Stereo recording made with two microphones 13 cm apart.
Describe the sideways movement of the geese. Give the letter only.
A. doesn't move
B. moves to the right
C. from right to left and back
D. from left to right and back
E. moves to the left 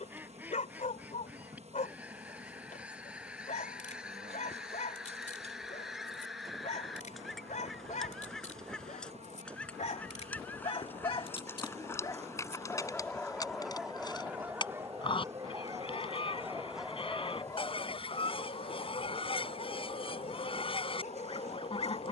E.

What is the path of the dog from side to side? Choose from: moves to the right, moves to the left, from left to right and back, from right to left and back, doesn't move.
from left to right and back.